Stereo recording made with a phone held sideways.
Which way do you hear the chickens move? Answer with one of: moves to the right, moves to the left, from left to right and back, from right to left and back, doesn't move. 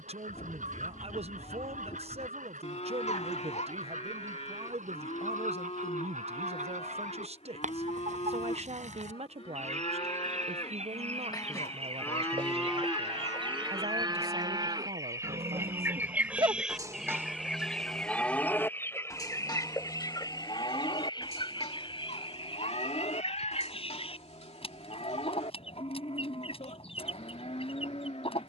moves to the left.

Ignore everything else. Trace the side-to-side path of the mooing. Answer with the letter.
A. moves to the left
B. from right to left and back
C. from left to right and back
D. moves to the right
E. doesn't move
C.